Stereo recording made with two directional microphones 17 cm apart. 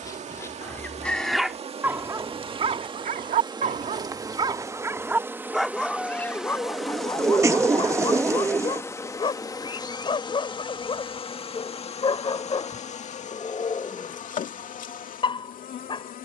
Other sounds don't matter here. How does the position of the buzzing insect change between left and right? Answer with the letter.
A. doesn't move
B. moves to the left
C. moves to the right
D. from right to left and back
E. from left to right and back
B.